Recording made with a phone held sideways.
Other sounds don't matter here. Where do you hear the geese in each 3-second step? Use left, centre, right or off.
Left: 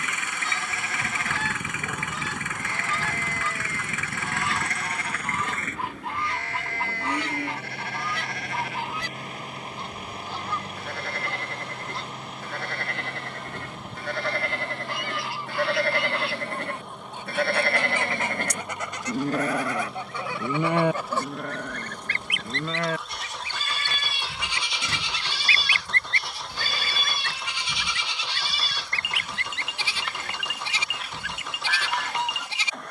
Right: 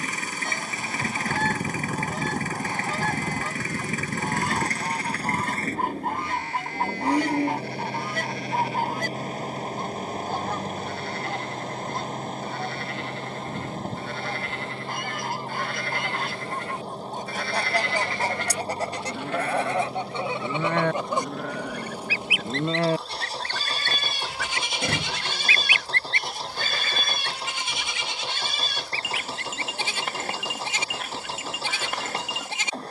right, right, right, right, right, right, right, centre, left, left, left.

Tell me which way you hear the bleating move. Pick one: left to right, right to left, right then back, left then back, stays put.
left to right.